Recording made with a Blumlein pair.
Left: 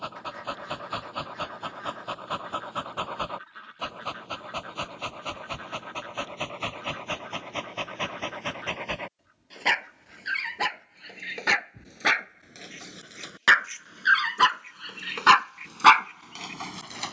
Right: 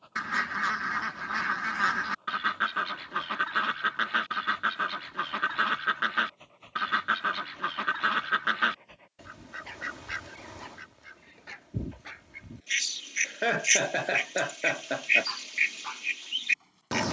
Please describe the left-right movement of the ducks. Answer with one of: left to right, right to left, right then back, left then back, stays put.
stays put.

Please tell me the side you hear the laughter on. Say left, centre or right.
right.